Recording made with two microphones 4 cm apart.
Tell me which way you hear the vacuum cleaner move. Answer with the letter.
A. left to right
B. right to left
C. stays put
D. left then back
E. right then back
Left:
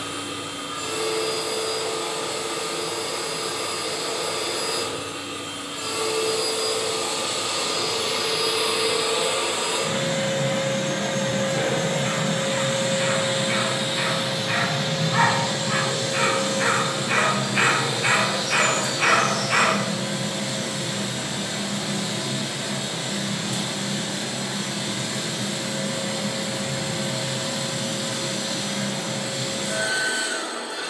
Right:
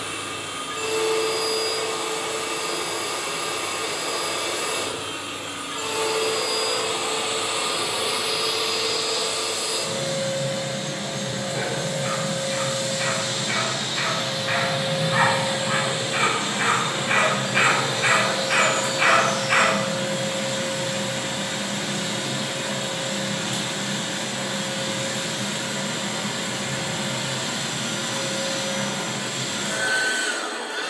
D.